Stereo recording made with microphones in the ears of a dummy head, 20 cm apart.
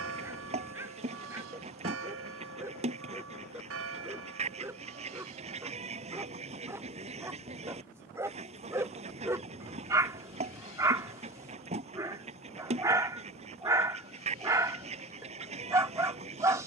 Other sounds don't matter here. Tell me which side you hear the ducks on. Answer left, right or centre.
right.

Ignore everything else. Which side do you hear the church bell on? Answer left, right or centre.
right.